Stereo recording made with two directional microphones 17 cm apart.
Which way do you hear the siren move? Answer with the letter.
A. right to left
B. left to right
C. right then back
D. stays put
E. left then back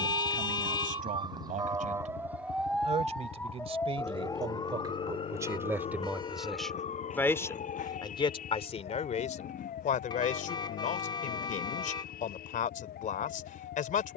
A.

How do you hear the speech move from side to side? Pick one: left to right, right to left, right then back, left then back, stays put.
right to left.